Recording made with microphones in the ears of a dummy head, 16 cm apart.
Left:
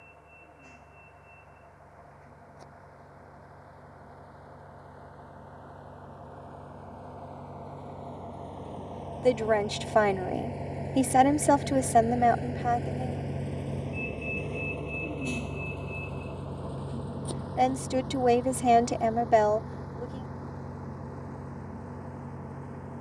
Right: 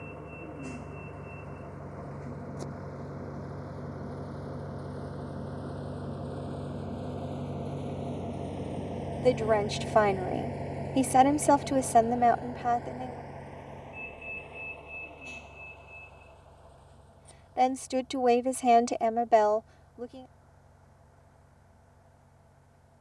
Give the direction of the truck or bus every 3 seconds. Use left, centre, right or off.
right, right, right, centre, left, left, left, left.